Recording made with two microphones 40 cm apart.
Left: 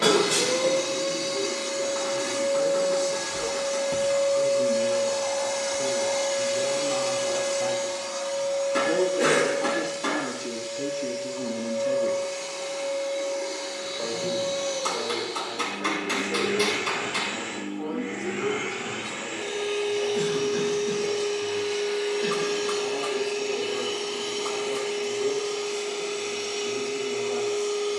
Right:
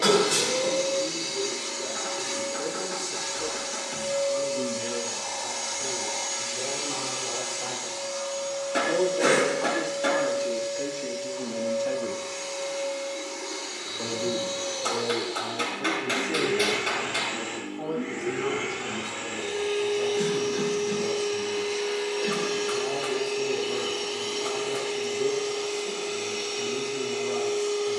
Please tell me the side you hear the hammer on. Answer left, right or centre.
centre.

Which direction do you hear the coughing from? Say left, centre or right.
left.